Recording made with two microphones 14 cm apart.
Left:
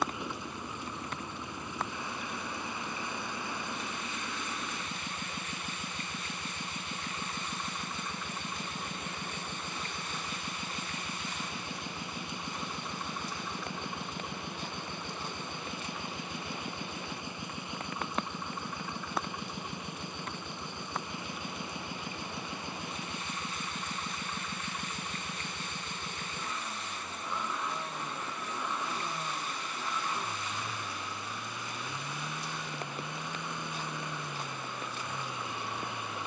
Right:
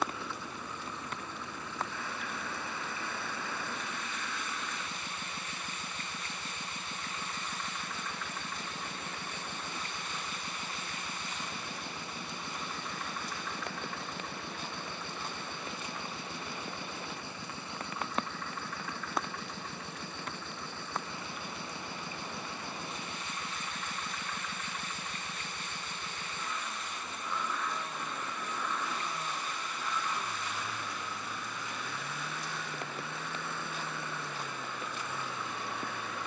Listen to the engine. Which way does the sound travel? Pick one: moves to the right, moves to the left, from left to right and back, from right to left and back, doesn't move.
doesn't move.